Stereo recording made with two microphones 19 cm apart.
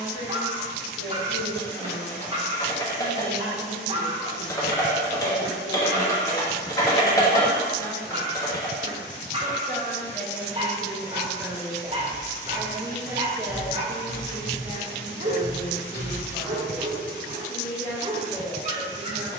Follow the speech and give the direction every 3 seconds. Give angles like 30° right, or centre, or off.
40° left, 40° left, 30° left, 10° left, centre, 30° left, 30° left.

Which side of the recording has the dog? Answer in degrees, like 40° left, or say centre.
30° right.